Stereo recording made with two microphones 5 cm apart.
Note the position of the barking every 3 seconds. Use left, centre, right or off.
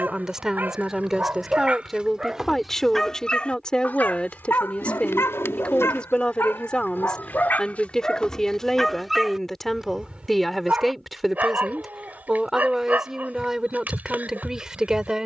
right, left, left, right, right.